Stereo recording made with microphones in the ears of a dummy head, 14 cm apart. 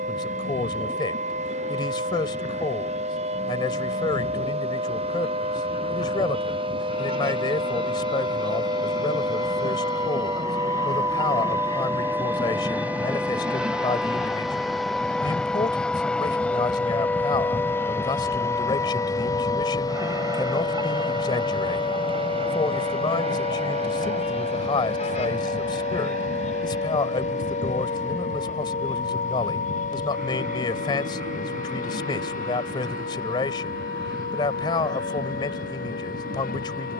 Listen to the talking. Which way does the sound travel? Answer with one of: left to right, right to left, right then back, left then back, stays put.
stays put.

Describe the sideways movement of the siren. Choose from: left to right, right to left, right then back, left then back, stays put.
right to left.